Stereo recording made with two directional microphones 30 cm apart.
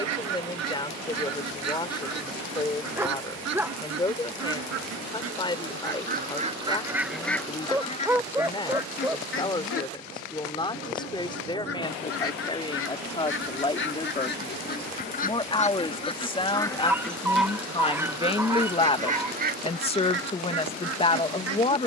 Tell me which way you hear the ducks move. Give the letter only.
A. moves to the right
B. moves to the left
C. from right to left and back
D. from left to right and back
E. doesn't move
C.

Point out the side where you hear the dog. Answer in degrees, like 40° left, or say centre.
10° right.